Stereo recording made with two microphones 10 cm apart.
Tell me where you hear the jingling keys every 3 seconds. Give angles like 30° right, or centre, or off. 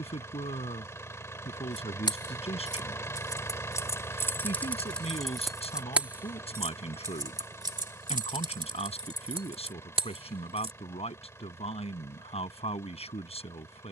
40° left, 10° left, 40° right, 60° right, off.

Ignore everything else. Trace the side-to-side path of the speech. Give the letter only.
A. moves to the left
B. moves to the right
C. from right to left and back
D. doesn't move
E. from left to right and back
D.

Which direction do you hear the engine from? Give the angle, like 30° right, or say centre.
30° left.